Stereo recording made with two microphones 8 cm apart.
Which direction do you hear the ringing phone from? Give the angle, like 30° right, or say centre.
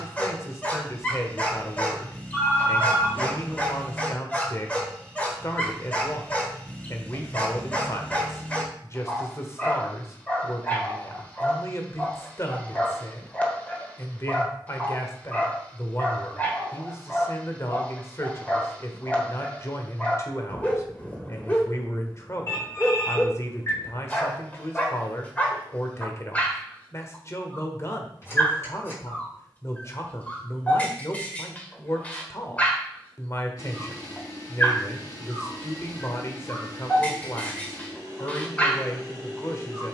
30° left.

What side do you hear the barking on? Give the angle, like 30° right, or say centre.
20° left.